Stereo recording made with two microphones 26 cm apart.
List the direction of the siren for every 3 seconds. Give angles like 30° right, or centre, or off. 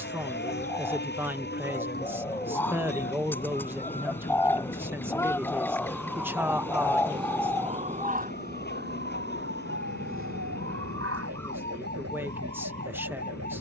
40° left, 20° left, 20° right, 50° right, 70° right.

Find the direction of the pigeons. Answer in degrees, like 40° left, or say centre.
10° left.